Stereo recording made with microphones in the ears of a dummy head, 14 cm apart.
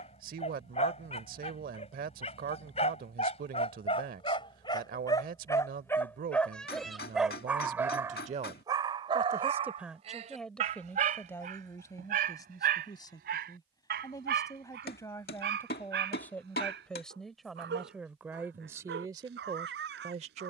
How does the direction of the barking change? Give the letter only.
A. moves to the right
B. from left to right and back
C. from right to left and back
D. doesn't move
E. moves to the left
A.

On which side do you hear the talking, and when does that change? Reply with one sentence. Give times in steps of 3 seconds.
In this clip you hear the talking on the right from 0 s, in the centre from 9 s, on the left from 12 s, in the centre from 15 s and on the right from 18 s.